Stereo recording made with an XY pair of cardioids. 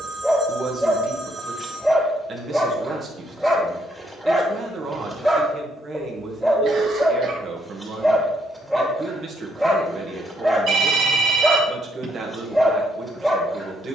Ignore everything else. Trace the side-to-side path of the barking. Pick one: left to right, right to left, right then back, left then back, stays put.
stays put.